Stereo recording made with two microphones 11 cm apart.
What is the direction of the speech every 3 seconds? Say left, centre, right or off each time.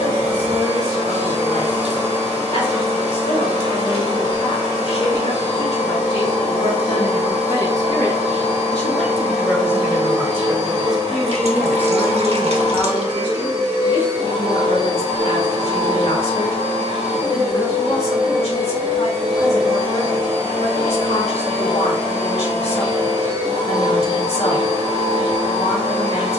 left, left, left, centre, left, left, left, left, left.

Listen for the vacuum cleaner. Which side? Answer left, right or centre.
right.